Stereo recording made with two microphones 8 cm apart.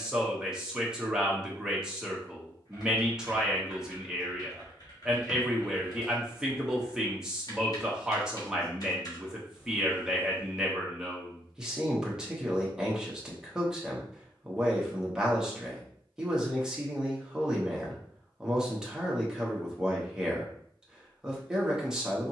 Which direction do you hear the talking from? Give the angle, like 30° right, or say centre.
10° right.